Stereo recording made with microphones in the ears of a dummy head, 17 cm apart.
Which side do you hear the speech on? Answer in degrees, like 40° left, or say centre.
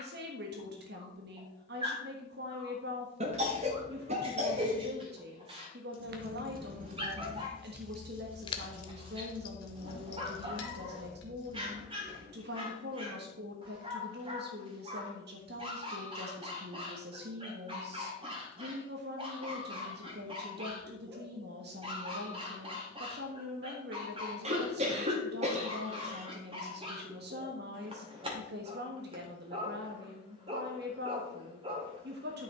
60° right.